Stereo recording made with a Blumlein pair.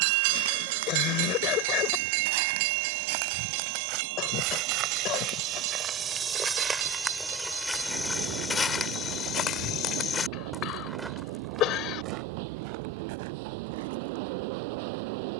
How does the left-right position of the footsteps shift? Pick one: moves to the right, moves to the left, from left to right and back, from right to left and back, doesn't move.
from right to left and back.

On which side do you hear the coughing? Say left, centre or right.
left.